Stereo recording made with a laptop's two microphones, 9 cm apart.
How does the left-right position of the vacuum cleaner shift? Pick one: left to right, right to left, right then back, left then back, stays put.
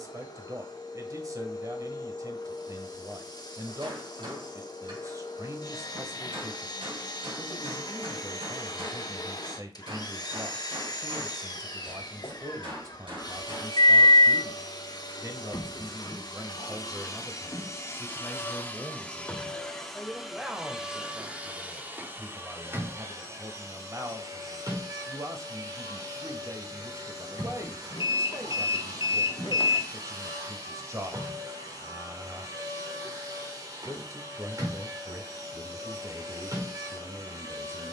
left to right.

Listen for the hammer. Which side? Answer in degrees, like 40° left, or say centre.
70° right.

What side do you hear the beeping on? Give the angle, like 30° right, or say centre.
60° left.